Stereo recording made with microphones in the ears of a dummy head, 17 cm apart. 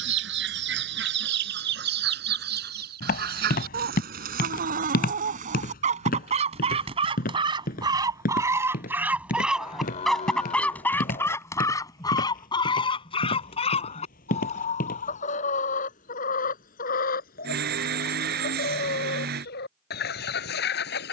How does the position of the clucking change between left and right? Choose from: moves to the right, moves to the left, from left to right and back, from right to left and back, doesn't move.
moves to the left.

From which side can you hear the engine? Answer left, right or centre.
right.